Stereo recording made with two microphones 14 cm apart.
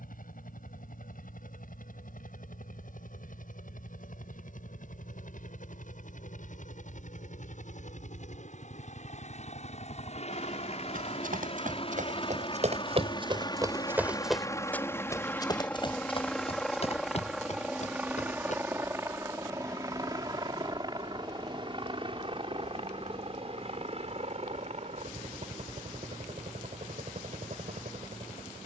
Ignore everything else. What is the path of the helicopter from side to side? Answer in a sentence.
You can hear the helicopter go from the left side to the right.